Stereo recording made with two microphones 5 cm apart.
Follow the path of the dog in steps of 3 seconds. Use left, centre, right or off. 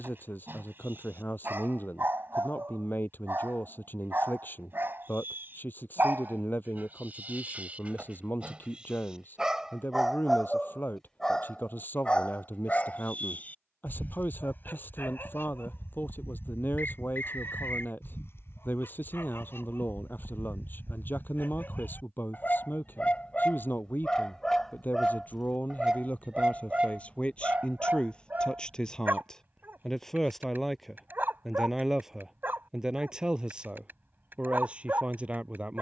right, right, right, centre, left, left, left, left, centre, right, right, right.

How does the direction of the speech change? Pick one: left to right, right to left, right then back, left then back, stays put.
left to right.